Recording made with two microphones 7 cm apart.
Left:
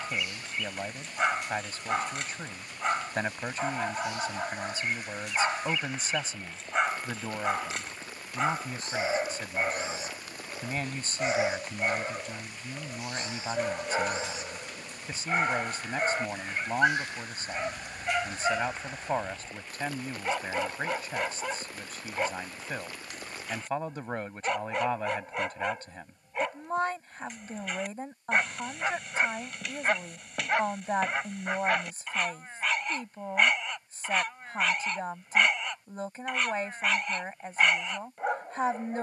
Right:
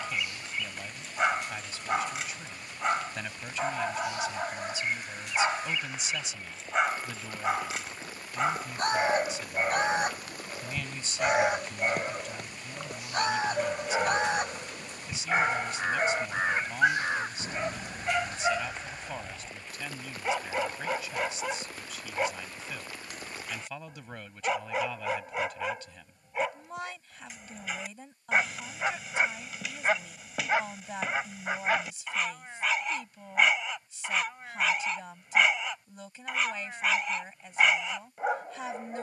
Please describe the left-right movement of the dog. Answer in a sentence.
You can hear the dog stay in one place.